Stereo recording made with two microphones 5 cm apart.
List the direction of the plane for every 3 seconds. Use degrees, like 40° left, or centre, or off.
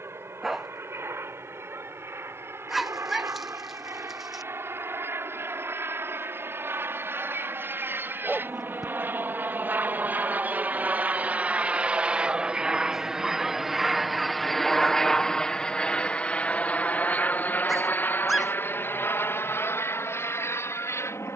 70° right, 60° right, 50° right, 40° right, 10° right, 30° left, 50° left.